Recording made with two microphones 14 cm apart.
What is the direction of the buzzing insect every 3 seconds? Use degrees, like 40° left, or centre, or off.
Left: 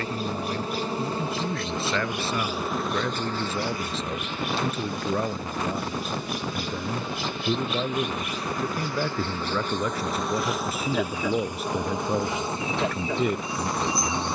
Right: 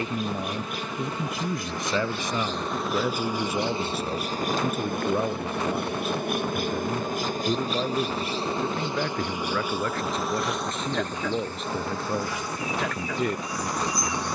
20° left, 40° right, 40° right, centre, 20° left.